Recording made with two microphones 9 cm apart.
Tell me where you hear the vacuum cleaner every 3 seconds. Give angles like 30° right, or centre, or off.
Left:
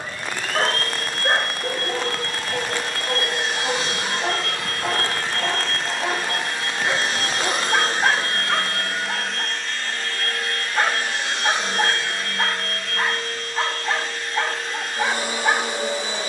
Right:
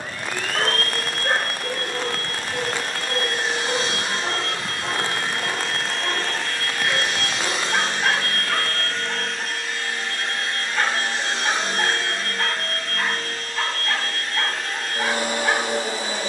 50° right, 30° right, 30° left, 20° right, 50° right, 50° right.